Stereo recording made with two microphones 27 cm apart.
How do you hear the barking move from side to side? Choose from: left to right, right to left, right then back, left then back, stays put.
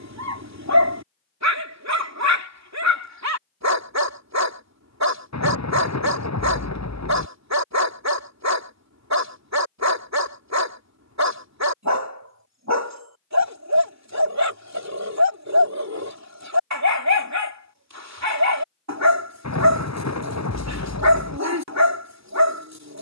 stays put.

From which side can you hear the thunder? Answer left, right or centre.
left.